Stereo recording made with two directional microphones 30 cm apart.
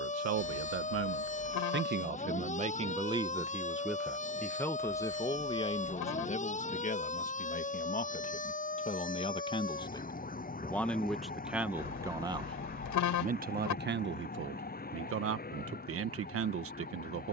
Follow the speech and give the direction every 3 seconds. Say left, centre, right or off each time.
right, centre, left, centre, right, right.